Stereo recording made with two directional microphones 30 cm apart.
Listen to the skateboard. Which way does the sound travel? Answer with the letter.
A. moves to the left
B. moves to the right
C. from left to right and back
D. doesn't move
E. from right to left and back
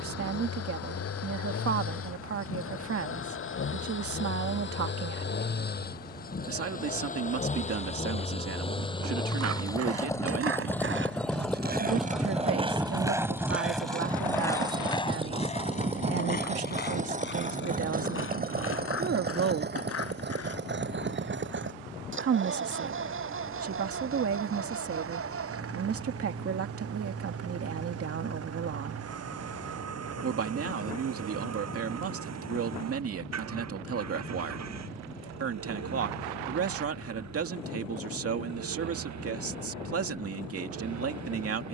A.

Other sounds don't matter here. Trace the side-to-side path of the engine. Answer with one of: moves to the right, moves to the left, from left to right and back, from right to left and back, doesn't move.
moves to the right.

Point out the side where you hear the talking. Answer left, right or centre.
right.